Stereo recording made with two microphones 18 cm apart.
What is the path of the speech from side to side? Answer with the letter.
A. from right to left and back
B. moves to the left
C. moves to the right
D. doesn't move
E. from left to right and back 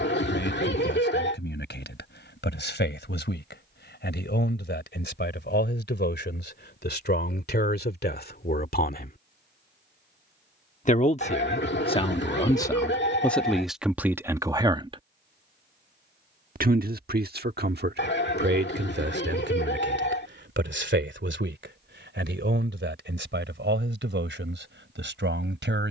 C.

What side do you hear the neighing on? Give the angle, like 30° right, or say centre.
70° left.